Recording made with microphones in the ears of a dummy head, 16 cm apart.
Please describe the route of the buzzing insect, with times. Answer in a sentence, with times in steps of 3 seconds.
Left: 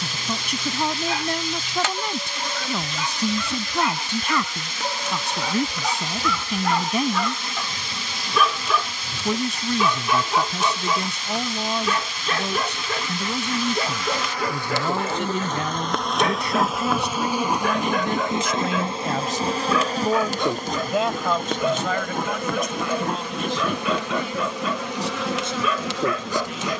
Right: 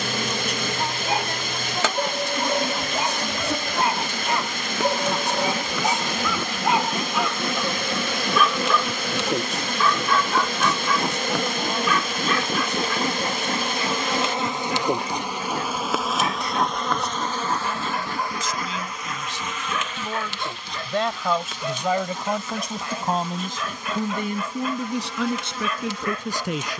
In this clip you hear the buzzing insect on the right from 0 s, in the centre from 15 s and on the left from 18 s.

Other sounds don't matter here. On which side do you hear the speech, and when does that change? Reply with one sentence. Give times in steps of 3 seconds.
In this clip you hear the speech on the left from 0 s and on the right from 21 s.